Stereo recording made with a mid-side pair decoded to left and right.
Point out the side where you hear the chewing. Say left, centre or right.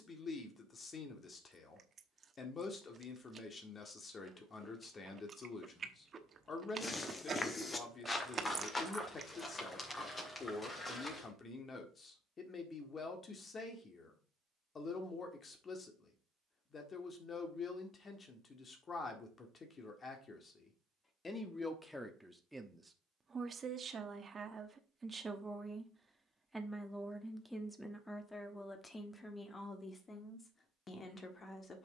right.